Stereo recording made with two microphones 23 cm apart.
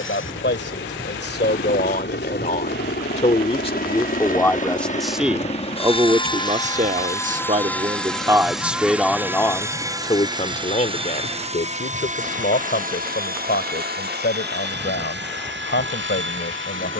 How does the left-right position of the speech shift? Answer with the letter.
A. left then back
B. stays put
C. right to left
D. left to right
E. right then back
E.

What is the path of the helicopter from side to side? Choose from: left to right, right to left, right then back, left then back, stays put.
left to right.